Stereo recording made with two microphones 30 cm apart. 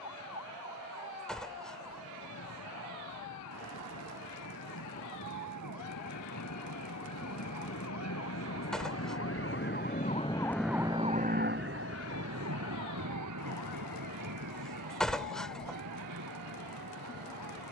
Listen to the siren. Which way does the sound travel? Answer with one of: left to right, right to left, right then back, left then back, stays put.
left to right.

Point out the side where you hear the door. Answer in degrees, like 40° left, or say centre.
centre.